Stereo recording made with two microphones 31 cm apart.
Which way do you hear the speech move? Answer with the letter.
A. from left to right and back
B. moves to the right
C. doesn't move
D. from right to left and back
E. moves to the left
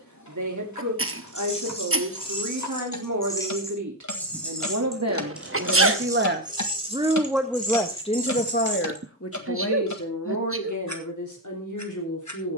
E.